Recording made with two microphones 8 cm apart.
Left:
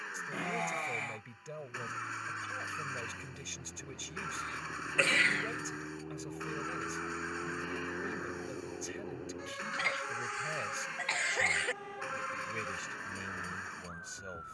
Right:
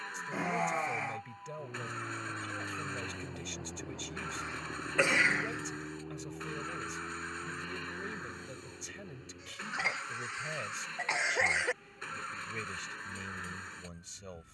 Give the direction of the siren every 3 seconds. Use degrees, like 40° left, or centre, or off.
40° right, 20° right, 30° left, 60° left, 70° left.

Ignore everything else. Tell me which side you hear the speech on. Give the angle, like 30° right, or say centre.
centre.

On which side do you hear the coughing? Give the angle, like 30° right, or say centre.
20° right.